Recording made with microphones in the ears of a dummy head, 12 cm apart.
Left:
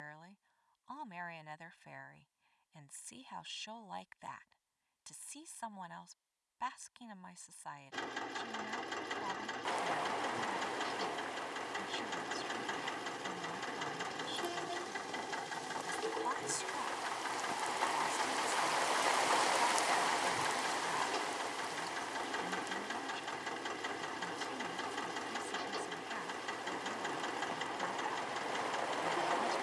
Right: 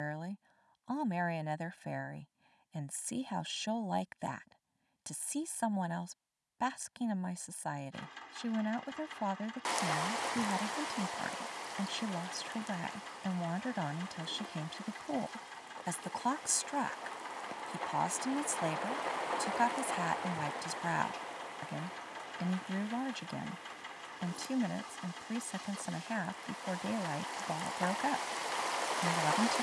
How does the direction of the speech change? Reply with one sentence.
You can hear the speech stay in one place.